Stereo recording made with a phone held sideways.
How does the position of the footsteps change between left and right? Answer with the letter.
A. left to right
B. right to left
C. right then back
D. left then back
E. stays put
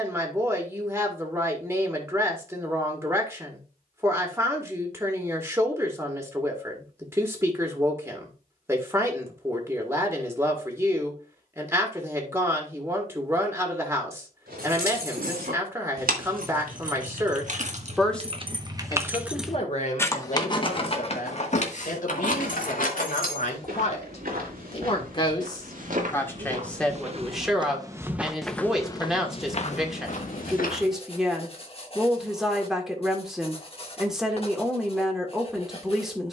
B.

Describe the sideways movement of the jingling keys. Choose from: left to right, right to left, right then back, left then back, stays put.
right to left.